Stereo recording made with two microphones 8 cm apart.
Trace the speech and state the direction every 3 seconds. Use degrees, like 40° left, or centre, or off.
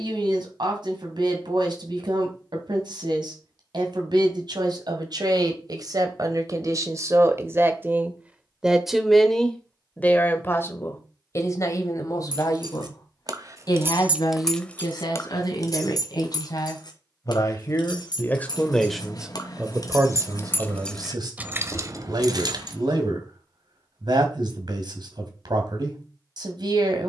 70° right, 60° right, 30° right, 30° left, 50° left, 50° left, 20° right, 60° right, 60° right.